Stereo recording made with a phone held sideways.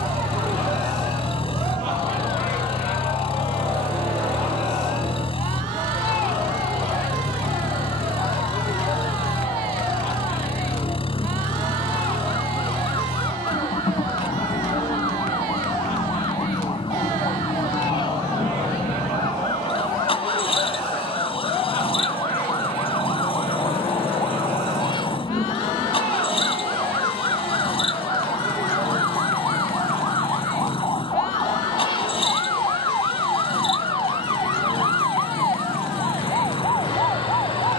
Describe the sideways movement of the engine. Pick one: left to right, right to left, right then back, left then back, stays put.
stays put.